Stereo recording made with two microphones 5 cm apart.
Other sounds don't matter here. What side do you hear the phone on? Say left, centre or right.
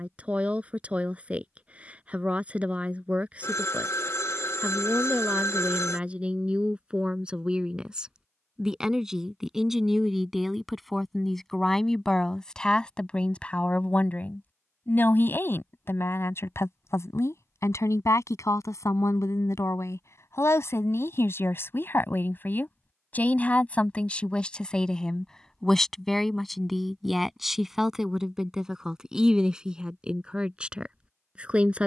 left.